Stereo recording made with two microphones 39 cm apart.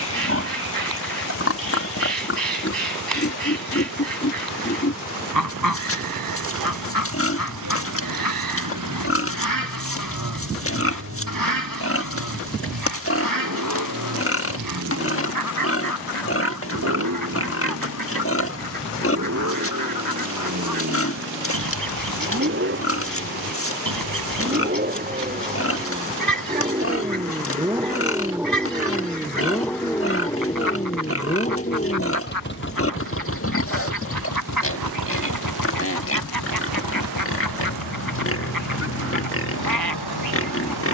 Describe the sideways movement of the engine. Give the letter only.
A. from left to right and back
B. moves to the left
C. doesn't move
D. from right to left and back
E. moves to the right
B.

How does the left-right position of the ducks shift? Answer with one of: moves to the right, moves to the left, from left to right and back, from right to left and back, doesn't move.
doesn't move.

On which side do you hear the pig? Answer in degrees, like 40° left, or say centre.
30° left.